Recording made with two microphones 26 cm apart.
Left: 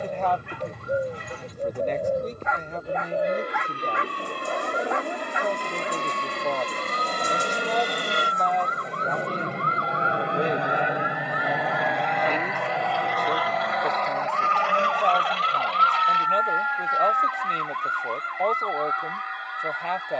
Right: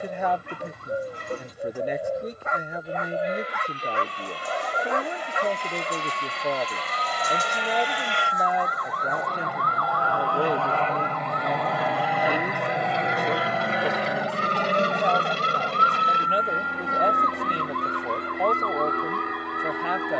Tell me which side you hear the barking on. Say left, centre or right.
right.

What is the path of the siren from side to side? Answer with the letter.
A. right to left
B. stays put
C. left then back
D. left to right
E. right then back
D.